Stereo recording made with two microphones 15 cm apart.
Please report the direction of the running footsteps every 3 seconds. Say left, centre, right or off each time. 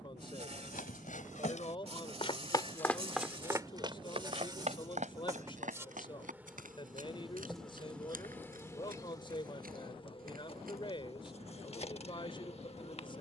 left, right, right, right, off.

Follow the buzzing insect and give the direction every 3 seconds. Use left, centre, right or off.
right, right, centre, left, left.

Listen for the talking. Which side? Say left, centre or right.
left.